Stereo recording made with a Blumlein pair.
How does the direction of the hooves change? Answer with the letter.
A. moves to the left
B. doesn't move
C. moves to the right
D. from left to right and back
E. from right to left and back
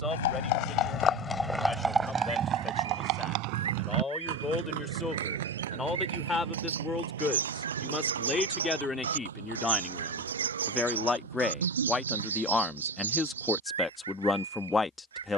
C.